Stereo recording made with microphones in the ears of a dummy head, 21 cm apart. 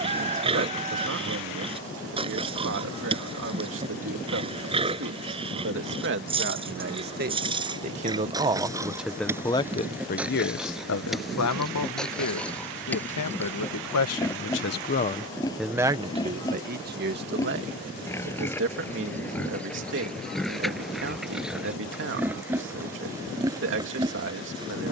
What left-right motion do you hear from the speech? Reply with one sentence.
You can hear the speech move from right to left and back again.